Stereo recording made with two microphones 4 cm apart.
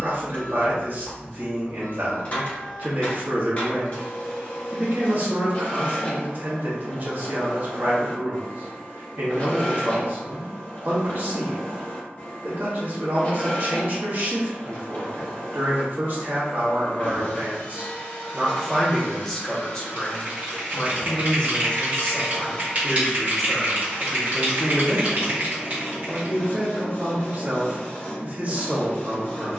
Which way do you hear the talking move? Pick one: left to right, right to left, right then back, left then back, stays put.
left then back.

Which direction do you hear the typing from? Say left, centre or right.
right.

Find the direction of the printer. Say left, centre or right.
left.